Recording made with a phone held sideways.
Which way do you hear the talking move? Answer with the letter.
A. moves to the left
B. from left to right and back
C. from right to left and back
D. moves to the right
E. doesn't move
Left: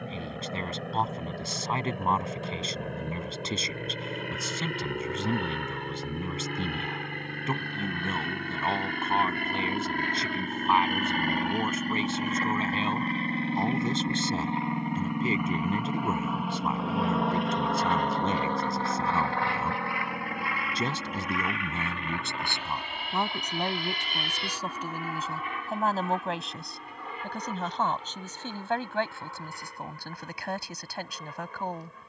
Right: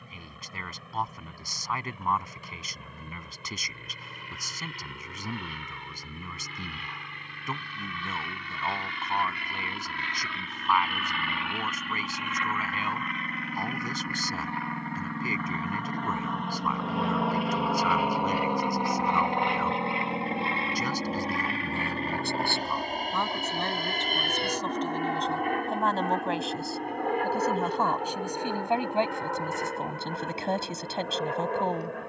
D.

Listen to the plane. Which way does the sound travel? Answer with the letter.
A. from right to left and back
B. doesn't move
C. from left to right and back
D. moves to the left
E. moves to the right
E.